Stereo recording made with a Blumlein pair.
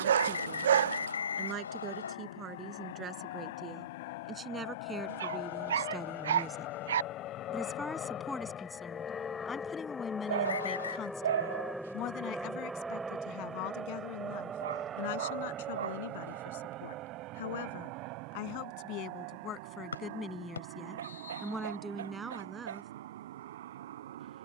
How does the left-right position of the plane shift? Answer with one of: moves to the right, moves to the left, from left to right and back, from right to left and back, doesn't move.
moves to the right.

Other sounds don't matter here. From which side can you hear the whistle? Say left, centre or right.
left.